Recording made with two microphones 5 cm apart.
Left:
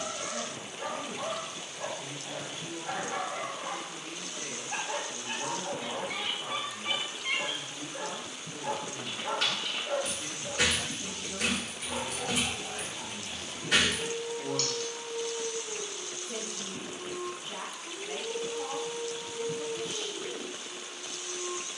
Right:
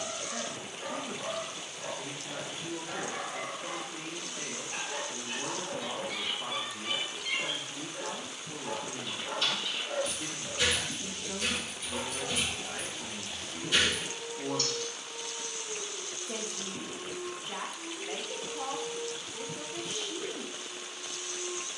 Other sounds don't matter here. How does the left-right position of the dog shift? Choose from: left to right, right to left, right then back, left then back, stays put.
stays put.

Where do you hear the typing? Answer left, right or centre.
left.